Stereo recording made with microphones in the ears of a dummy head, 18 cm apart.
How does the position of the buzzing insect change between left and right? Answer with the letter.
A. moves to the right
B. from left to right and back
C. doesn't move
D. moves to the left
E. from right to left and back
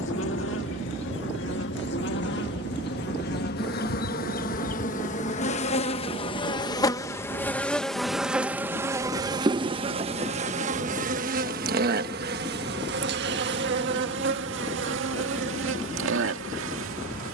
A.